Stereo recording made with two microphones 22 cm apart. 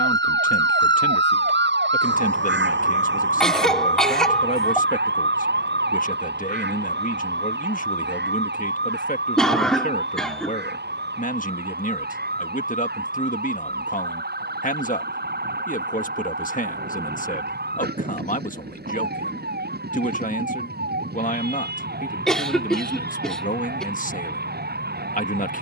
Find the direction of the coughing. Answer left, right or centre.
centre.